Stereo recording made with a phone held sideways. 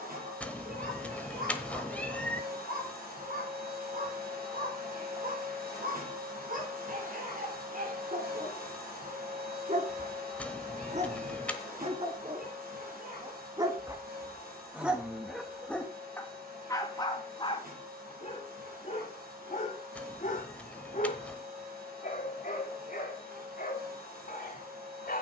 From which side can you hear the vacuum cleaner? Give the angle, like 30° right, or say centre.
80° right.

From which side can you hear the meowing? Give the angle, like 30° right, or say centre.
10° left.